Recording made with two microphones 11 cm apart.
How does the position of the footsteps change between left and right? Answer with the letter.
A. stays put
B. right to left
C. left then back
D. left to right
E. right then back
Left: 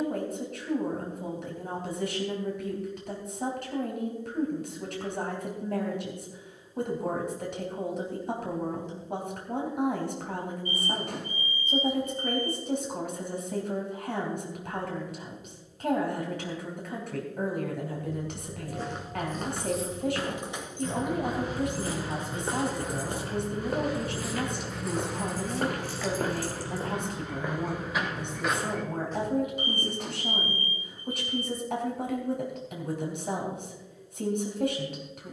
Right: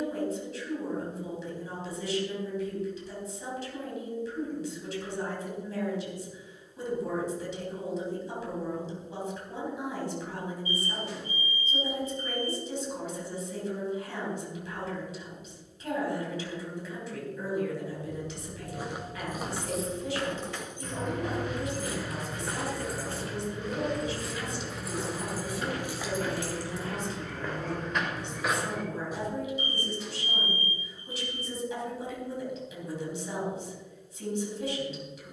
C.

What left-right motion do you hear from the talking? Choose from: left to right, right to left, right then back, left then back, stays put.
stays put.